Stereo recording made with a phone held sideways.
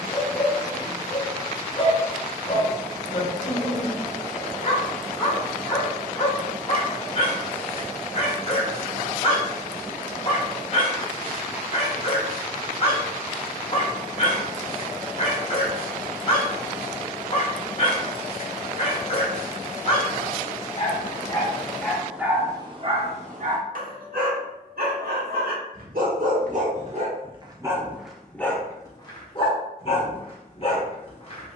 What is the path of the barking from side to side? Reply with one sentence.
You can hear the barking go right and come back.